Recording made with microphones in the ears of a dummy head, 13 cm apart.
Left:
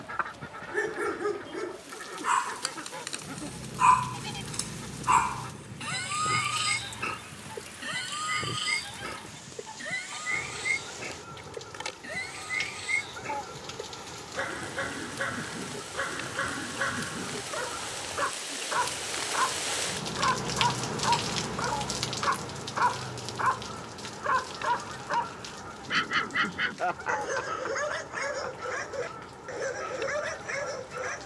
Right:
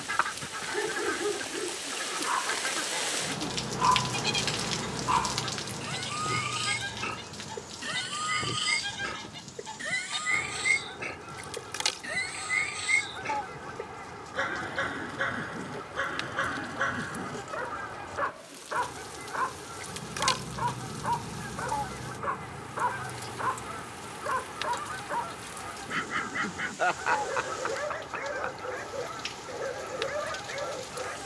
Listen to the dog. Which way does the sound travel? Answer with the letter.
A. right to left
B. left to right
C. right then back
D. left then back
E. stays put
C.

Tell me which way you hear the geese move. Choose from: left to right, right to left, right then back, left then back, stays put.
stays put.